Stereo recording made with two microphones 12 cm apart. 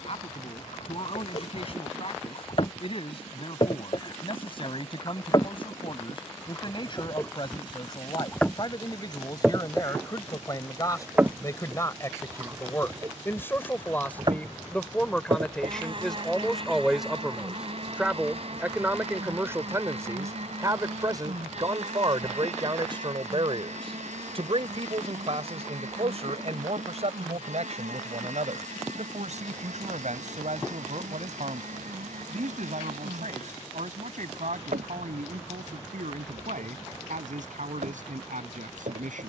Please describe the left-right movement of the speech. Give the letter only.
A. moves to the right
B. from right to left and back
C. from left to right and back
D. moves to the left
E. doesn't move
A.